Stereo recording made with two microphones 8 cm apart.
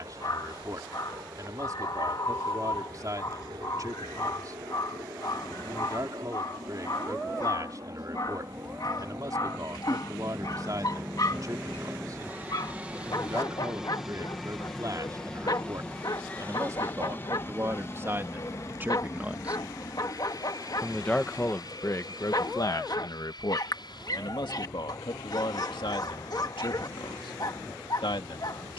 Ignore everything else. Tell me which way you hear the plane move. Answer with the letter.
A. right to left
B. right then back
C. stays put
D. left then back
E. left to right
A.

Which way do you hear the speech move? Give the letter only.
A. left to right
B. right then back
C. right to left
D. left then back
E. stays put
C.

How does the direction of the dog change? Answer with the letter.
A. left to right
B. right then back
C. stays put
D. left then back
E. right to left
C.